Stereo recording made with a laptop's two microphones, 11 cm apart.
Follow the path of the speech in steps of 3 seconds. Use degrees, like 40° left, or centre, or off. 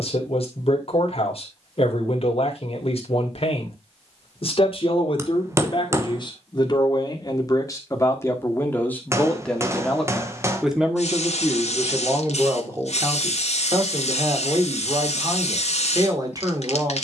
60° left, 50° left, 30° left, centre, 30° right, 30° right.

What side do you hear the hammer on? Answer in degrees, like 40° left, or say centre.
20° right.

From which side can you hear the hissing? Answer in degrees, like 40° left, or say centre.
70° left.